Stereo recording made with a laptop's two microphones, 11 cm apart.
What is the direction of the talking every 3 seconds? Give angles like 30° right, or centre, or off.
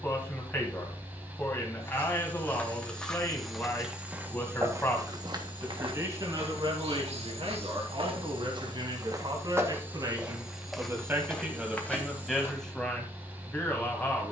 20° left, 10° left, 50° right, 30° right, 10° left.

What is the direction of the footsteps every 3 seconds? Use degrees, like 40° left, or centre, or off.
20° left, 20° right, 60° right, 10° right, 20° left.